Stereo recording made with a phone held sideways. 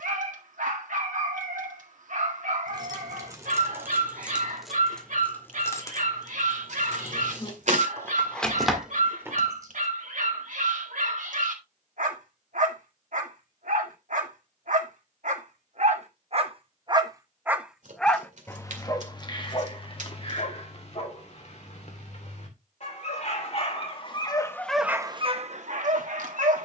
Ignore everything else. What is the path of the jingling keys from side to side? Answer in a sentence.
In this clip you hear the jingling keys go left and come back.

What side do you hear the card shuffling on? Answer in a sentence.
You can hear the card shuffling on the right.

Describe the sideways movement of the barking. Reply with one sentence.
You can hear the barking move from right to left and back again.